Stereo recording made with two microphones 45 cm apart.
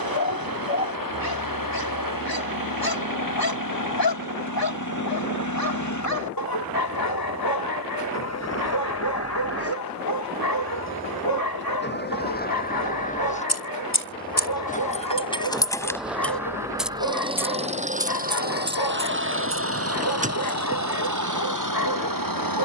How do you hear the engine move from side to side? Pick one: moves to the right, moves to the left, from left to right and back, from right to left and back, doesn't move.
moves to the right.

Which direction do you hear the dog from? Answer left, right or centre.
left.